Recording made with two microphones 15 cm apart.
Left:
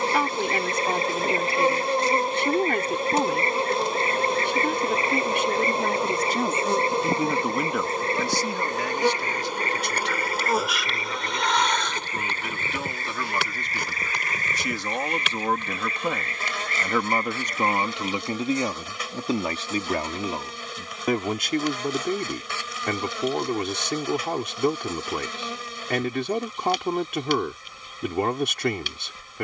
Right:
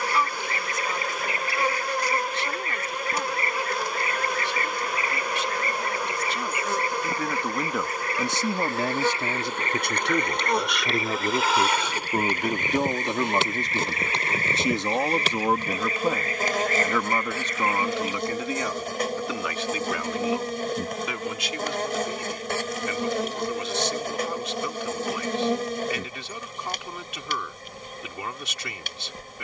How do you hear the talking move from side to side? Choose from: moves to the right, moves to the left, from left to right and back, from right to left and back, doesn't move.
from left to right and back.